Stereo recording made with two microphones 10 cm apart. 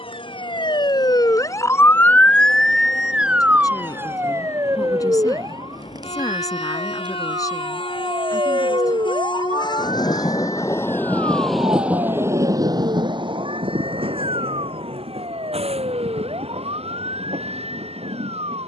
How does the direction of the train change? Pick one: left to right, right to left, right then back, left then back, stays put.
left to right.